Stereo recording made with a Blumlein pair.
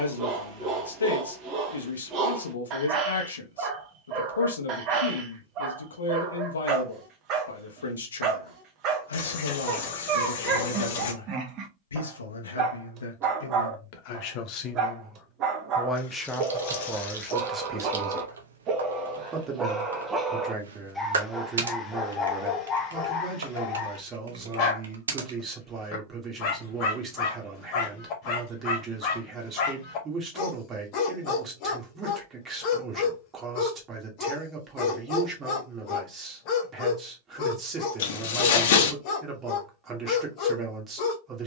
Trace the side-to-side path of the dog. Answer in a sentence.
You can hear the dog go from the right side to the left.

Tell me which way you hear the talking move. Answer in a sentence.
You can hear the talking move to the right.